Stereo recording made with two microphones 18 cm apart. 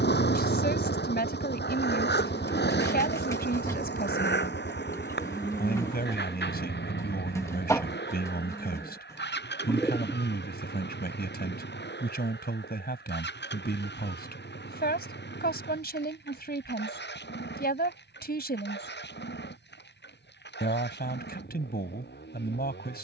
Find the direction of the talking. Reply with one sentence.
In this clip you hear the talking on the left.